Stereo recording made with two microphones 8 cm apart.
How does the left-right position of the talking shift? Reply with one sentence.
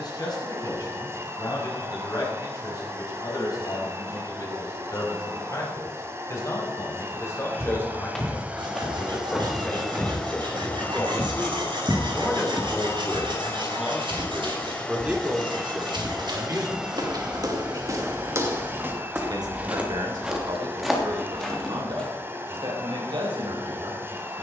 In this clip you hear the talking go from the left side to the right.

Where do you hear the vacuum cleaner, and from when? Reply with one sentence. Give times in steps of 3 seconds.
In this clip you hear the vacuum cleaner on the right from 0 s, in the centre from 9 s, on the left from 12 s, in the centre from 15 s and on the right from 18 s.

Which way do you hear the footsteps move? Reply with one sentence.
You can hear the footsteps go right and come back.